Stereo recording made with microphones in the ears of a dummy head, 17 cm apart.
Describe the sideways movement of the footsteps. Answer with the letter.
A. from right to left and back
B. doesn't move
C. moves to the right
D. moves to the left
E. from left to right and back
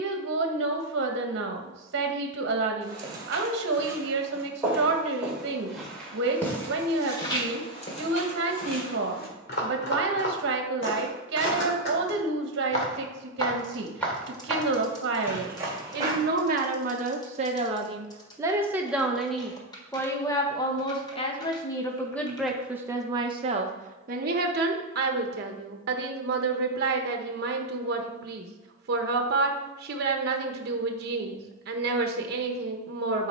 A.